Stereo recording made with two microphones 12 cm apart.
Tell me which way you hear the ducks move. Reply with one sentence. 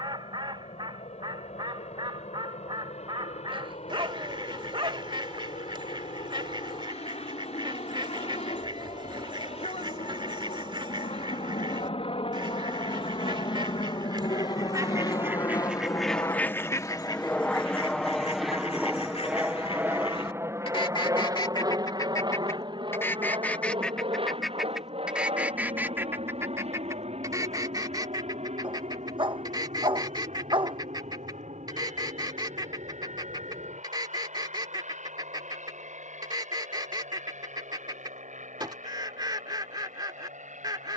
In this clip you hear the ducks move from right to left and back again.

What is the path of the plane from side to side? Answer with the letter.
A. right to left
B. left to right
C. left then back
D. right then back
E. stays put
B.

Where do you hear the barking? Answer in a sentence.
In this clip you hear the barking on the right.